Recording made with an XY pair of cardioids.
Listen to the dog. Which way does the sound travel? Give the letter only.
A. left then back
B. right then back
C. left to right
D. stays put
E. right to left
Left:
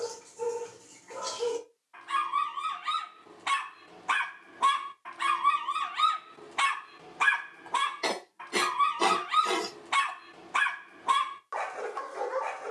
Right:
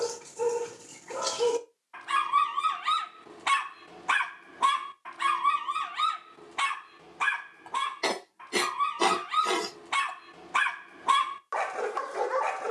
A.